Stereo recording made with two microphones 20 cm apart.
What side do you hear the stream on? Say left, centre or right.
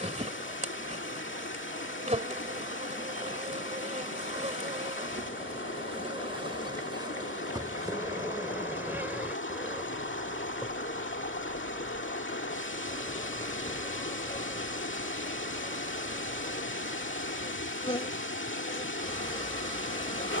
left.